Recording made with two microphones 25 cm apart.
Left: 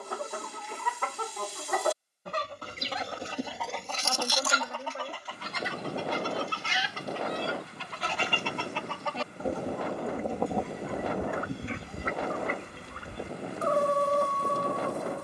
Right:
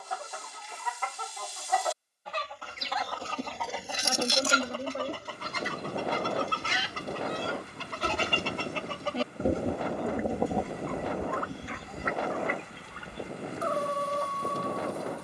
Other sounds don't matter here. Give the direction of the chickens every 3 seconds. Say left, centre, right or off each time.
left, right, right, centre, left.